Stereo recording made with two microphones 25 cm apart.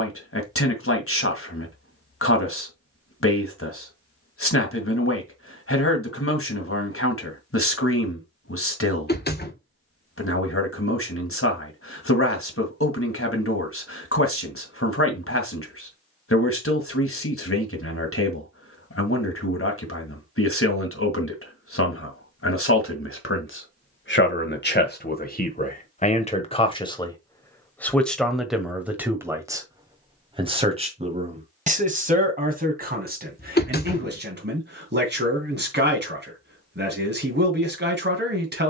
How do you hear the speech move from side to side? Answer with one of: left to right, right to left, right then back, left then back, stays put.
left to right.